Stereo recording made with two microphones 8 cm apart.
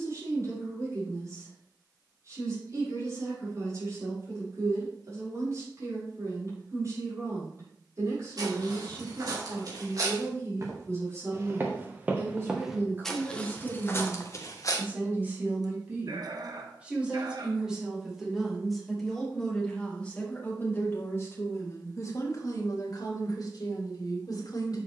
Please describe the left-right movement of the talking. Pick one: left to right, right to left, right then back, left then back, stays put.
right to left.